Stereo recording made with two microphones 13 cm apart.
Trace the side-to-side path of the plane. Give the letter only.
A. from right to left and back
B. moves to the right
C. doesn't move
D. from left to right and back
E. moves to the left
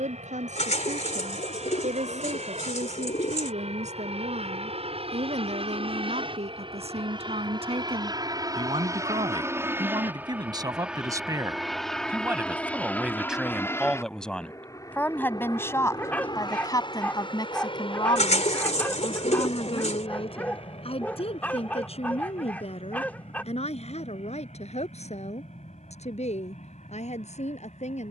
E.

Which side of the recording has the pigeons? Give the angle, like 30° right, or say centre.
70° left.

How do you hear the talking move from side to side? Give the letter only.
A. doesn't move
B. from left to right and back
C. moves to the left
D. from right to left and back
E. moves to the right
C.